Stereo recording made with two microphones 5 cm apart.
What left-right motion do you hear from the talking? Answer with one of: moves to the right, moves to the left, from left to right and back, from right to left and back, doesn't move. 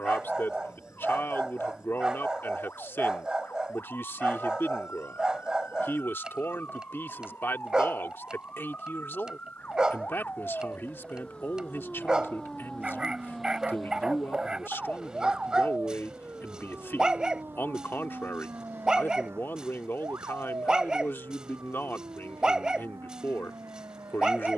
doesn't move.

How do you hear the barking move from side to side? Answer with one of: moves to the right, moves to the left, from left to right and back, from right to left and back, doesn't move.
doesn't move.